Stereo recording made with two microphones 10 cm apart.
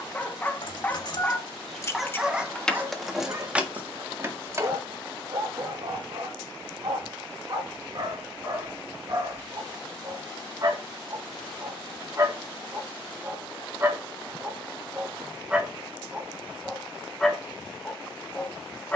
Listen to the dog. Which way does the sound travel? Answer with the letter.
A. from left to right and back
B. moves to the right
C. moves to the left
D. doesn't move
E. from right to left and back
A.